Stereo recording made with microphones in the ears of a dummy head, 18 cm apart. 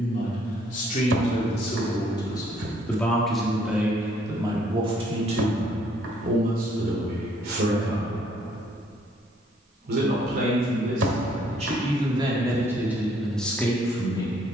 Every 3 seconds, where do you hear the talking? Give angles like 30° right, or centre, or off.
30° left, 20° right, 60° right, 50° right, centre.